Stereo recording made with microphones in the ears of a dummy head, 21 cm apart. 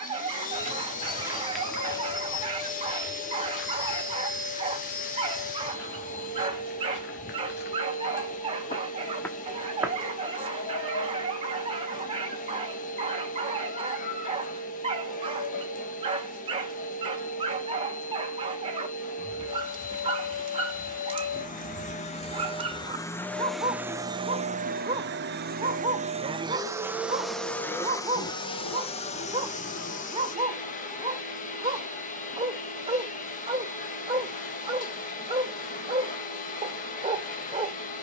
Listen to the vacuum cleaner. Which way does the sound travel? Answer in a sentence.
You can hear the vacuum cleaner move from left to right and back again.